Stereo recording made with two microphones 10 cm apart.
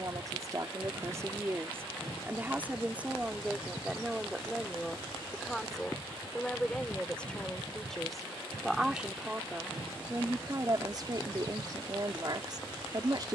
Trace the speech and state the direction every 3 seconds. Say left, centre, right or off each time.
right, centre, centre, right, right.